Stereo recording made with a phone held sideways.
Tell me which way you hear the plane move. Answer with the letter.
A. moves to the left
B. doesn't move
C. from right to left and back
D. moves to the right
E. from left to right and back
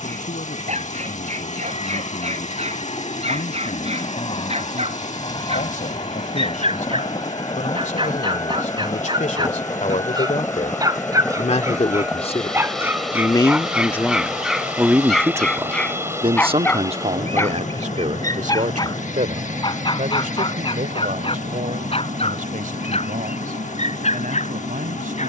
D.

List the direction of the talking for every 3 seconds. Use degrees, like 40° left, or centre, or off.
80° left, 80° left, 70° left, 60° left, 20° left, 40° right, 70° right, 80° right, 80° right.